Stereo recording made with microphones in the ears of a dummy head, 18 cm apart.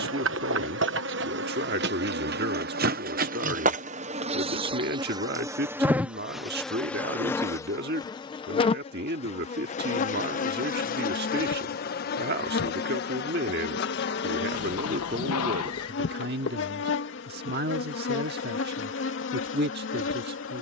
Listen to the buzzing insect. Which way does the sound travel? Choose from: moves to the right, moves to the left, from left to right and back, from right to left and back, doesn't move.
moves to the left.